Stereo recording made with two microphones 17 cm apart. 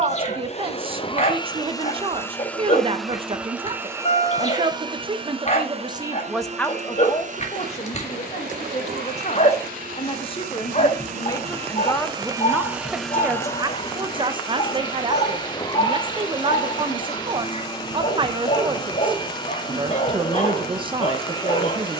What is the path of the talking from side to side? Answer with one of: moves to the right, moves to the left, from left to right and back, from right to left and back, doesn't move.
from right to left and back.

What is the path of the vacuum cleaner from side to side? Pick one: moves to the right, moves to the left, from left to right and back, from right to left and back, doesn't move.
from left to right and back.